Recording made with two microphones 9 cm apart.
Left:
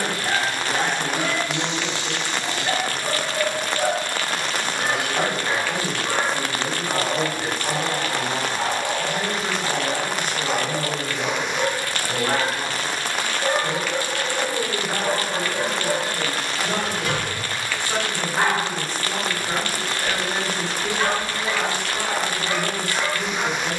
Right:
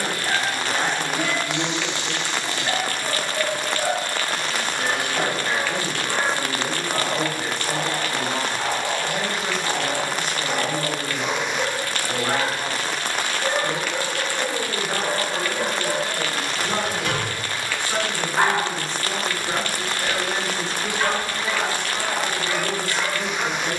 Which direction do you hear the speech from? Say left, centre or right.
centre.